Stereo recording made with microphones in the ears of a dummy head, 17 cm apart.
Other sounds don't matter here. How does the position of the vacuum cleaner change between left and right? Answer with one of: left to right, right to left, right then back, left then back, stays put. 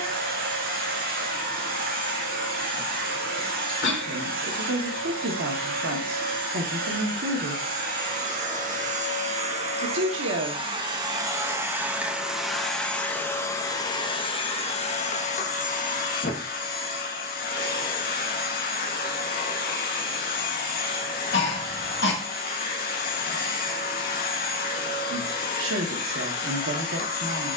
right to left.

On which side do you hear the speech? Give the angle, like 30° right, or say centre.
70° right.